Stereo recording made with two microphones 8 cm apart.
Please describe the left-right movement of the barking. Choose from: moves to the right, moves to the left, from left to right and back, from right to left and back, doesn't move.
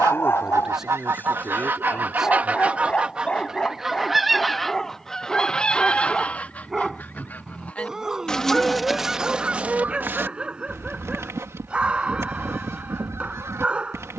moves to the right.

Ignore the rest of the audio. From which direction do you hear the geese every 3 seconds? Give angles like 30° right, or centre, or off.
30° right, centre, 10° left, 30° right, 40° right.